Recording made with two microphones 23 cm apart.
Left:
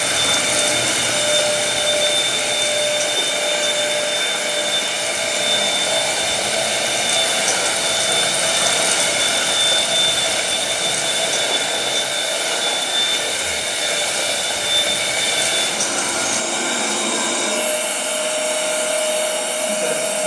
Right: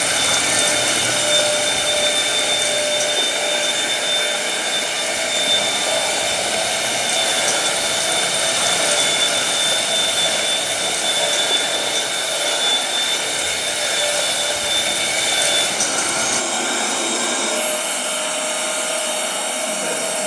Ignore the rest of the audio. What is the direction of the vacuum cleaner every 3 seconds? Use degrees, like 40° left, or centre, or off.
10° left, 20° right, 20° left, 20° left, 20° left, 20° left, 20° left.